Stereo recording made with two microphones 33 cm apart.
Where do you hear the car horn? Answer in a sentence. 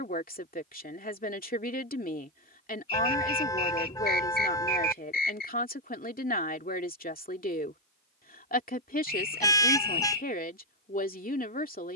In this clip you hear the car horn in the centre.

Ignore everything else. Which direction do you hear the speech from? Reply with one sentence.
You can hear the speech on the left.